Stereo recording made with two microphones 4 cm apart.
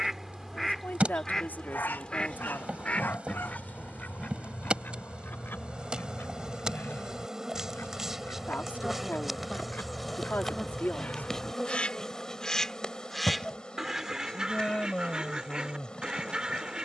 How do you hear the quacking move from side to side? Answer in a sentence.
You can hear the quacking move from right to left and back again.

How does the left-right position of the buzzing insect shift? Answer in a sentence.
In this clip you hear the buzzing insect travel towards the left.